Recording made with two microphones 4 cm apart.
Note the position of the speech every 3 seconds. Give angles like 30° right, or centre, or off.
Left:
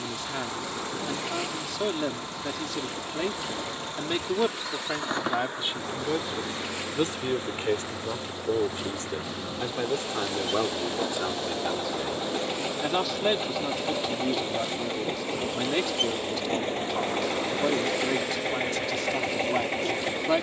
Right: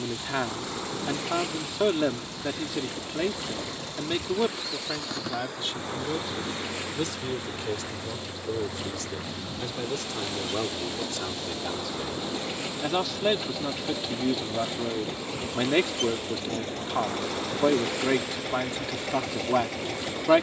20° right, 10° left, 30° left, 20° left, 10° right, 30° right, 30° right.